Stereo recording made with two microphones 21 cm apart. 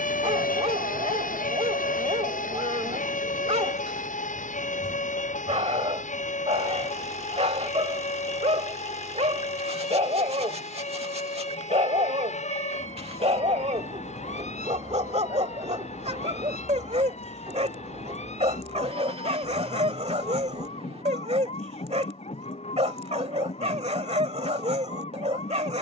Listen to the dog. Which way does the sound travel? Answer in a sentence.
In this clip you hear the dog stay in one place.